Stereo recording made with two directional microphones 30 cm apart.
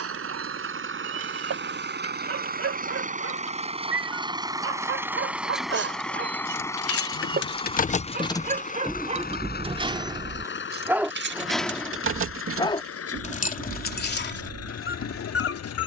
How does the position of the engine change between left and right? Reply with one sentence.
You can hear the engine move from right to left.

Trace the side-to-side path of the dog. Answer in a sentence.
In this clip you hear the dog move from right to left.